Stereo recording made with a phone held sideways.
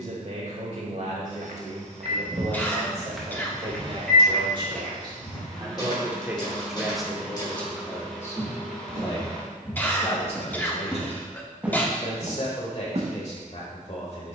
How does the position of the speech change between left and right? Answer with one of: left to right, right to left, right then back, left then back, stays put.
right to left.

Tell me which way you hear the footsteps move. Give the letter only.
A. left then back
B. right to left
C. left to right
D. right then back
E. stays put
A.